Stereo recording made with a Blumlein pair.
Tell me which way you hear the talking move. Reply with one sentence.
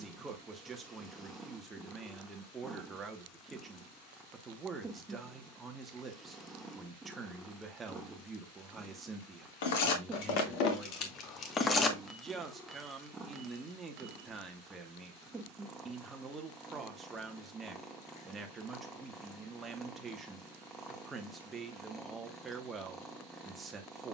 In this clip you hear the talking stay in one place.